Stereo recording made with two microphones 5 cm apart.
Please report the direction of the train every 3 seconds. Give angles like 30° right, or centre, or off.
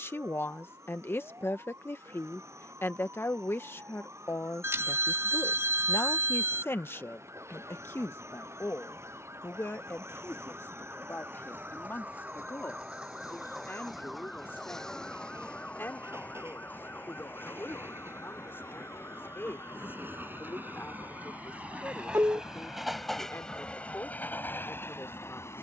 70° right, 70° right, 70° right, 70° right, 60° right, 60° right, 50° right, 10° right, 50° left.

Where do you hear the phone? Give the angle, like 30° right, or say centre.
60° right.